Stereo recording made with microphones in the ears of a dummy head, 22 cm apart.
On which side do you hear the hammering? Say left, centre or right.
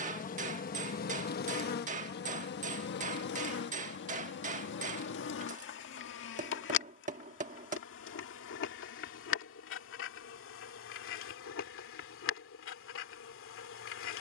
right.